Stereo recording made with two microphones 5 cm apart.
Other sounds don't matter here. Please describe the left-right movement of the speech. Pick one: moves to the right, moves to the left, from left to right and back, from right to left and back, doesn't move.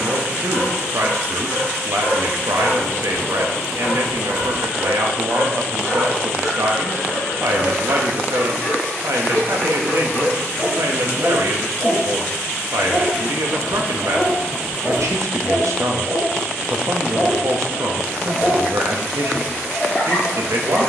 doesn't move.